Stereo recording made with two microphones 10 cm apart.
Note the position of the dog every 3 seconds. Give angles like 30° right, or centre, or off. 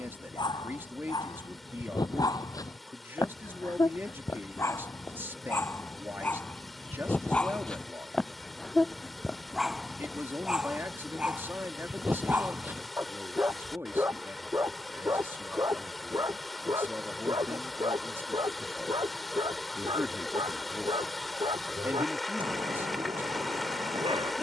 40° left, 30° left, 10° left, 10° right, 20° right, 30° right, 40° right, 50° right.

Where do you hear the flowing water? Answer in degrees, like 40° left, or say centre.
centre.